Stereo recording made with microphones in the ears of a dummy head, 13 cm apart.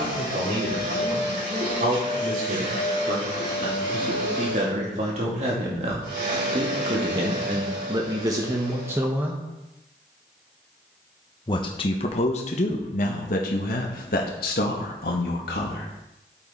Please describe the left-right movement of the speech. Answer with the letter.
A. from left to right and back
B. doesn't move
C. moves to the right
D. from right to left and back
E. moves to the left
E.